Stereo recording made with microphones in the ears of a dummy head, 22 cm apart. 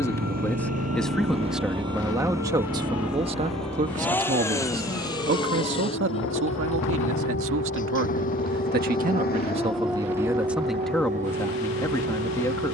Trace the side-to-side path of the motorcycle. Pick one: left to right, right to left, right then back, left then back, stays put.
right to left.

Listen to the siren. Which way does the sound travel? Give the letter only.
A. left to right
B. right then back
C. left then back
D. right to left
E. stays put
A.